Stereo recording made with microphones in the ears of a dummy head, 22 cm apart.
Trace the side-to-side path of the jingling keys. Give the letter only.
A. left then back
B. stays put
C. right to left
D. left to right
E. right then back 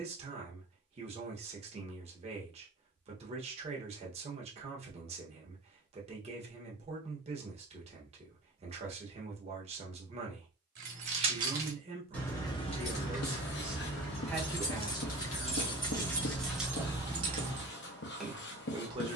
A.